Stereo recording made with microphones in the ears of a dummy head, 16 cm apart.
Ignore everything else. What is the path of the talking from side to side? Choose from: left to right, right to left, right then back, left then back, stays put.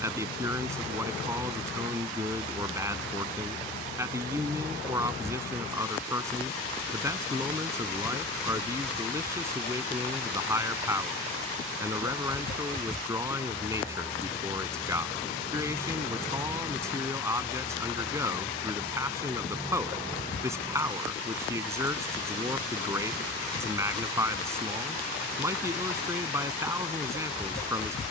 stays put.